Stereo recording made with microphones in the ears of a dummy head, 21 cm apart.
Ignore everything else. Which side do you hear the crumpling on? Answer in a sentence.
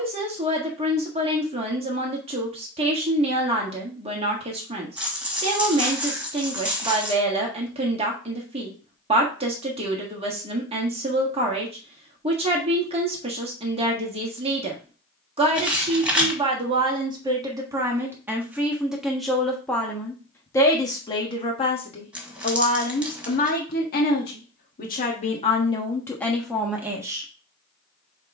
You can hear the crumpling in the centre.